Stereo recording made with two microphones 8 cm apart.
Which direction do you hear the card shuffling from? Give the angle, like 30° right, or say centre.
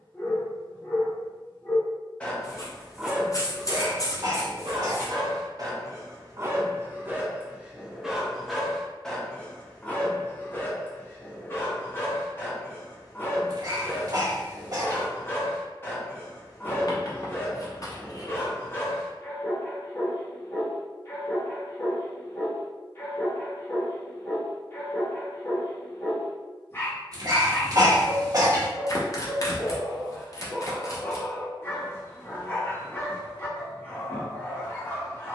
40° left.